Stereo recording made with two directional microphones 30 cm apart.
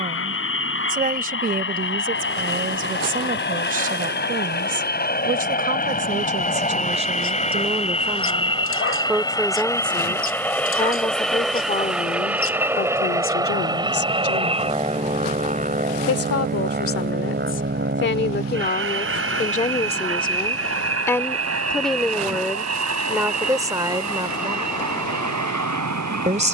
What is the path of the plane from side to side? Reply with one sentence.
You can hear the plane move to the right.